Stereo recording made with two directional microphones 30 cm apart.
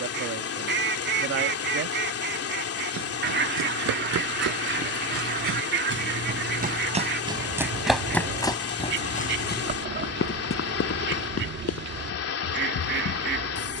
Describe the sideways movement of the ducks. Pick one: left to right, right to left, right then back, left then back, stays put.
stays put.